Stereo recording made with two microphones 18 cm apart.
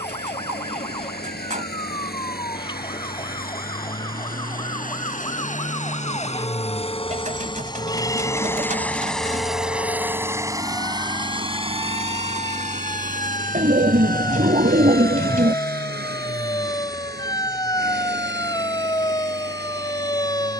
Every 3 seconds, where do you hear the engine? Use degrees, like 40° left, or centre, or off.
60° left, 50° left, 30° left, 20° right, 50° right, 60° right, 70° right.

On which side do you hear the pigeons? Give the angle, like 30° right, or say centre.
40° right.